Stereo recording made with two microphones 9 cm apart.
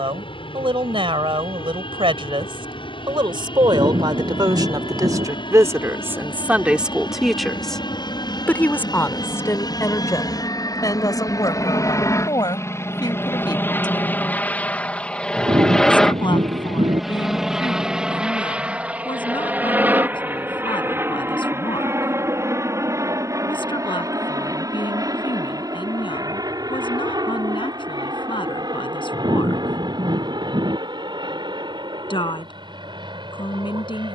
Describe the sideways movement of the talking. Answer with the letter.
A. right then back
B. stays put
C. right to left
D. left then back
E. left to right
C.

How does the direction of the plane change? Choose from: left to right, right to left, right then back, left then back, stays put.
left to right.